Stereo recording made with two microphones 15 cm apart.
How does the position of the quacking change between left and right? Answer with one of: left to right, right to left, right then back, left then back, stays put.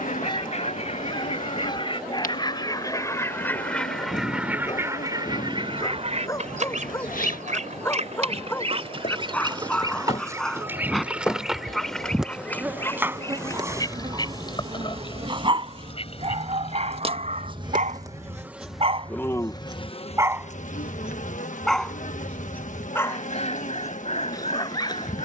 right then back.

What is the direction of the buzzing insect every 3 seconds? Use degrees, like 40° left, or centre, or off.
60° left, 60° left, 60° left, 30° left, 20° right, 40° right, 20° left, 60° left, 60° left.